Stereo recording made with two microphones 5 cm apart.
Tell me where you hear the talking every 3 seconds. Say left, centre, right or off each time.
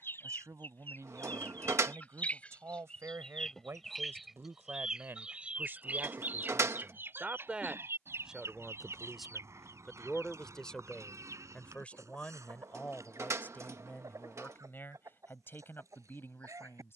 right, right, right, centre, left, left.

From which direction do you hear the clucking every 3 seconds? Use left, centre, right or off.
left, centre, right, right, right, right.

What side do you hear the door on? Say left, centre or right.
right.